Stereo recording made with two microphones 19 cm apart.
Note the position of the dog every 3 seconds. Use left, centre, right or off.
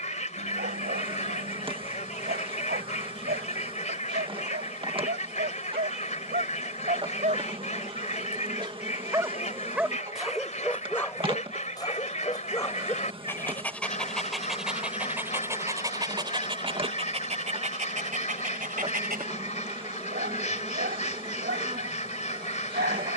right, right, right, centre, centre, right, right, right.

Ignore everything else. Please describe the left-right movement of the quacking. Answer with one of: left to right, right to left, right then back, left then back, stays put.
stays put.